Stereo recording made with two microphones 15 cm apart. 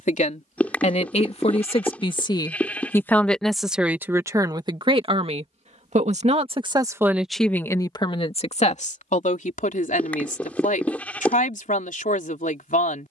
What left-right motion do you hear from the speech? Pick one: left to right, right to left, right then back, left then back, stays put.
right then back.